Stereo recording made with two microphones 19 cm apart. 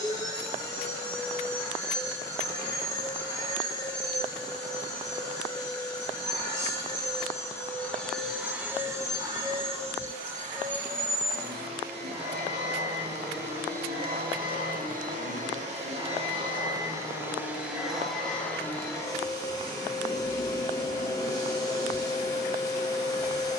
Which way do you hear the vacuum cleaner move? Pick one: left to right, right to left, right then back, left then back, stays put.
right then back.